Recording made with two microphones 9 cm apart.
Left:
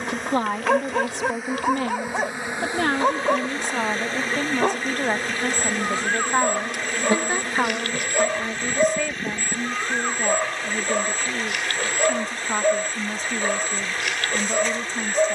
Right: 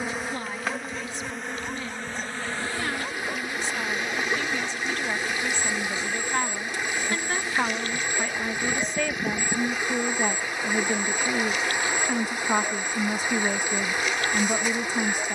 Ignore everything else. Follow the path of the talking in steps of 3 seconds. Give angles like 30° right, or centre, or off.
70° left, 50° left, 20° left, 10° right, 10° right.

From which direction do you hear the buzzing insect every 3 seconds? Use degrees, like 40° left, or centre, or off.
10° left, 40° left, 50° left, 10° right, 10° right.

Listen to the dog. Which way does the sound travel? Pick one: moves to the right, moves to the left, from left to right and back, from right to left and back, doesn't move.
doesn't move.